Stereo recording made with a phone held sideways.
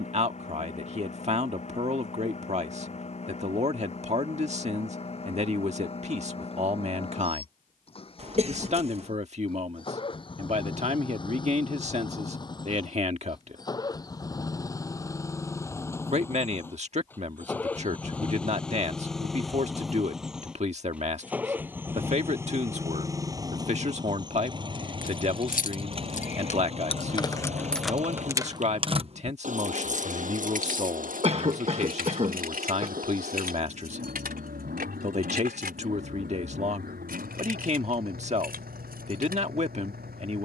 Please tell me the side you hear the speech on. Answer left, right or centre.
right.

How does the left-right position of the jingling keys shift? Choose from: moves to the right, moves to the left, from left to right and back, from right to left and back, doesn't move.
moves to the right.